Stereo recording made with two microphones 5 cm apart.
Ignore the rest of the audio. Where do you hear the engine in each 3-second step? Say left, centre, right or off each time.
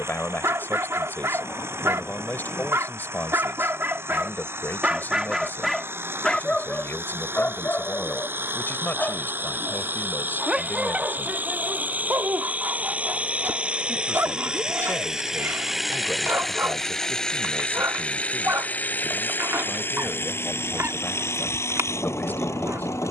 right, right, right, right, right, centre, left, left.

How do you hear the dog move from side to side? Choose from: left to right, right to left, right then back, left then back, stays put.
left then back.